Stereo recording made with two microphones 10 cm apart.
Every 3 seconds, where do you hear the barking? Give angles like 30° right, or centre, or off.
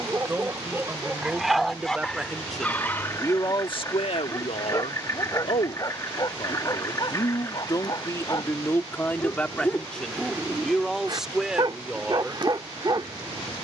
centre, 30° left, 40° left, centre, 40° right.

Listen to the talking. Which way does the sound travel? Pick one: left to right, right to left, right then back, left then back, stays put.
left then back.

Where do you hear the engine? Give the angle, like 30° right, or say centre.
30° left.